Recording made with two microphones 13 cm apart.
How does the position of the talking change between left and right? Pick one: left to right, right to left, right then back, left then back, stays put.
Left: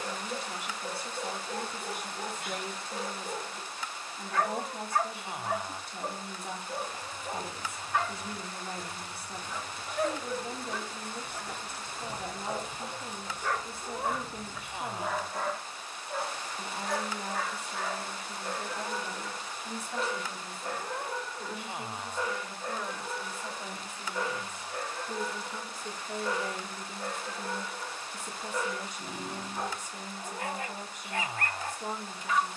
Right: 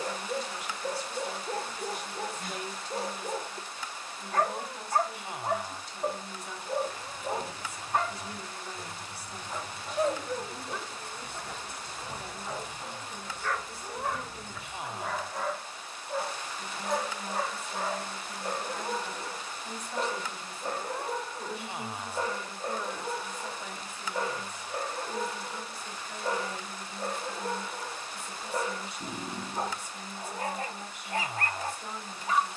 right then back.